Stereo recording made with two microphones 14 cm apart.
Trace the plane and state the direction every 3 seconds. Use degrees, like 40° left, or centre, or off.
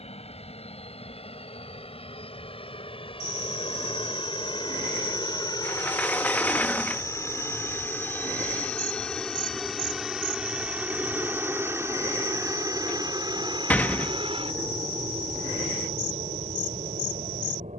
50° left, 40° left, 20° left, 10° right, 30° right, 50° right.